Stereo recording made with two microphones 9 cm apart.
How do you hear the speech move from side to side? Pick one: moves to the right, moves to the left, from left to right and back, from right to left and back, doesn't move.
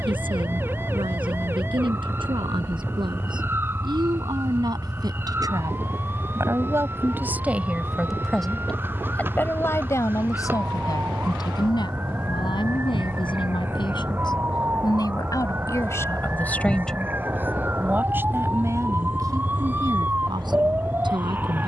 from right to left and back.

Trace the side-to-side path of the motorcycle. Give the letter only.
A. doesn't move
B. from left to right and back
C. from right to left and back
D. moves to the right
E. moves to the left
A.